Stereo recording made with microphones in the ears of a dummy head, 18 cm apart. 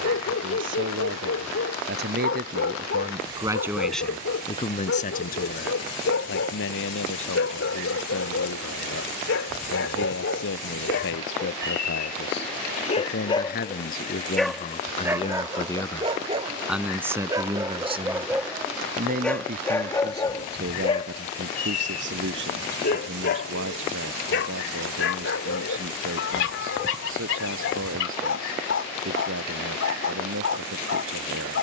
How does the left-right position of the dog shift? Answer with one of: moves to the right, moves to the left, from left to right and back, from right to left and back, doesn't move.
from left to right and back.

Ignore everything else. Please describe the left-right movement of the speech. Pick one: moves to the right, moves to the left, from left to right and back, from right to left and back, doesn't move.
from right to left and back.